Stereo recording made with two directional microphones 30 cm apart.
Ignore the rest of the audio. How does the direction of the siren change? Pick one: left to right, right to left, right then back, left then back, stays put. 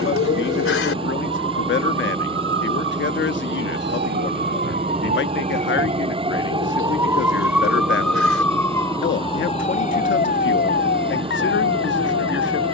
right to left.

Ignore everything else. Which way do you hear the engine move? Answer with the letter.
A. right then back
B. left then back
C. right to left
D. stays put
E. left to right
D.